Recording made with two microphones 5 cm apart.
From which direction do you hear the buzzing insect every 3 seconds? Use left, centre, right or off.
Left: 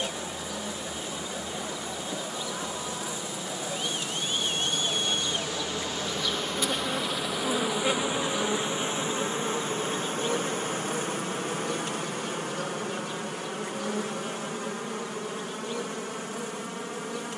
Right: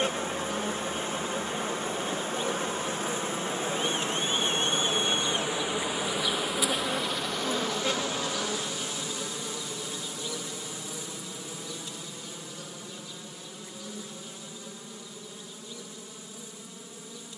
right, right, centre, left, left, left.